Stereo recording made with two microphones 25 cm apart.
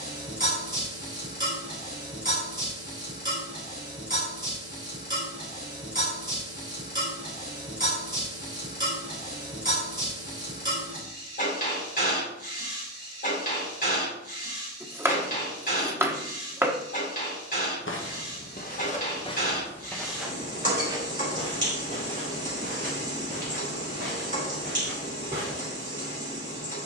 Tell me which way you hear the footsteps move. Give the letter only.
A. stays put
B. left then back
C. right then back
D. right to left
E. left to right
E.